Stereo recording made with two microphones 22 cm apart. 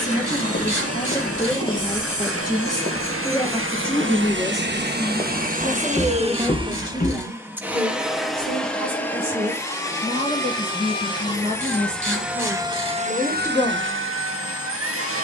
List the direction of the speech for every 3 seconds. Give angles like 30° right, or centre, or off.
20° left, centre, 20° right, 30° right, 20° right.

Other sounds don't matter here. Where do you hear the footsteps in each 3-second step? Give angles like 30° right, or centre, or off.
10° left, 30° right, 30° left, off, off.